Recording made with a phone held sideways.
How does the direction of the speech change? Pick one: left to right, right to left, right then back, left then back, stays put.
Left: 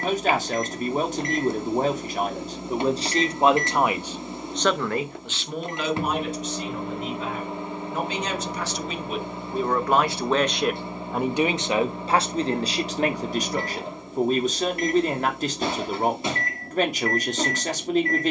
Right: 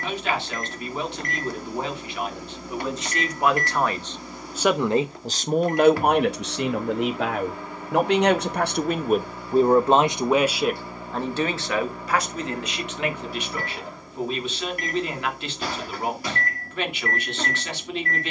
right then back.